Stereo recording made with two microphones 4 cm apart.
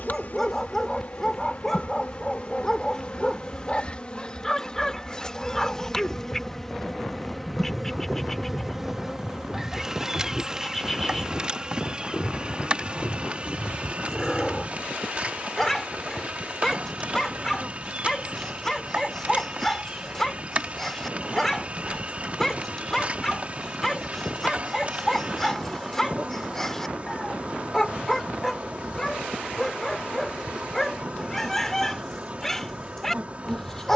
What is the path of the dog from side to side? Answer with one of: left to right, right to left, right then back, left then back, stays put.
stays put.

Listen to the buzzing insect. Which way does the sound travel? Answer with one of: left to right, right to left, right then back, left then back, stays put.
left to right.